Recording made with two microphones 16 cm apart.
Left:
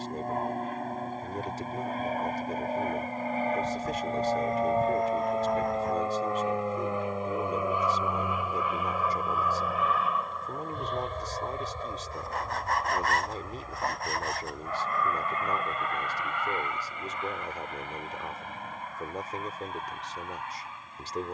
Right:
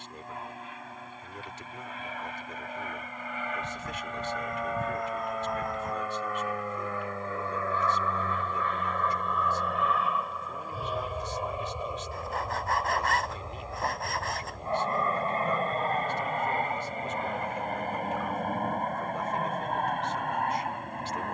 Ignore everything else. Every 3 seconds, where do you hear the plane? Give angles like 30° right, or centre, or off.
40° left, 30° left, 20° left, centre, 20° right, 30° right, 50° right.